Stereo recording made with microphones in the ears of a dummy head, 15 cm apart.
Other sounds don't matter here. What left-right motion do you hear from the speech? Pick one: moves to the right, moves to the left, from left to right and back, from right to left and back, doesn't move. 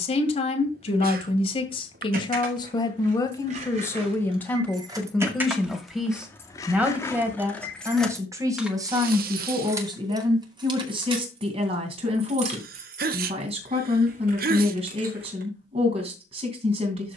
moves to the right.